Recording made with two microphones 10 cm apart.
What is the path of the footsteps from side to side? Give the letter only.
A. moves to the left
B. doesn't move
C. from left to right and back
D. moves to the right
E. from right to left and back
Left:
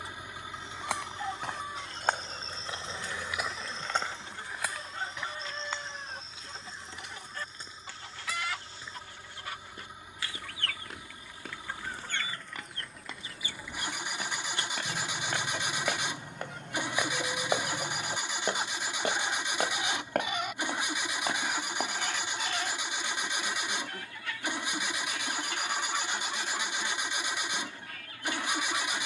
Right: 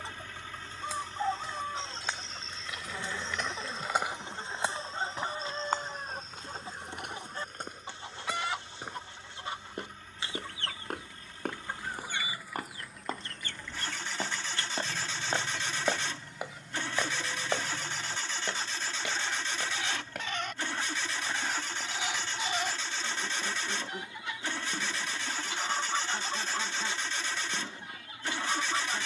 C.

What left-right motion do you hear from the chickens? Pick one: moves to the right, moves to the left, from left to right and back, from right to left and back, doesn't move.
from right to left and back.